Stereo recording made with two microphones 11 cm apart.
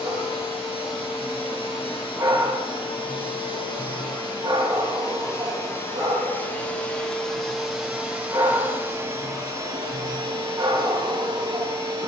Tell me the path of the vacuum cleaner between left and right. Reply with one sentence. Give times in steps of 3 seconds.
In this clip you hear the vacuum cleaner on the left from 0 s, in the centre from 6 s and on the right from 9 s.